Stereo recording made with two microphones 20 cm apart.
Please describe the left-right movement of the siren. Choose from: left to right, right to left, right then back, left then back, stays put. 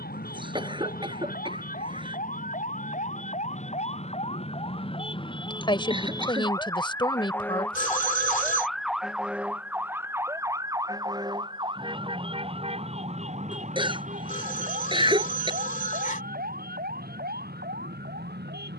left to right.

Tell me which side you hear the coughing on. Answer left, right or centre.
right.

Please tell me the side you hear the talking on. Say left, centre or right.
left.